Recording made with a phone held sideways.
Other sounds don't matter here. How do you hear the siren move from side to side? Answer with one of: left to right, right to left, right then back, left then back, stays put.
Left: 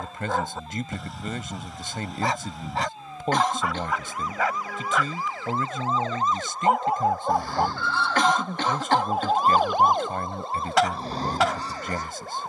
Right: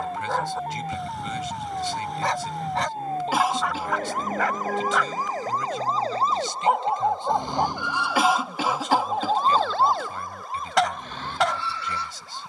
right to left.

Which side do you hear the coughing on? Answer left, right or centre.
centre.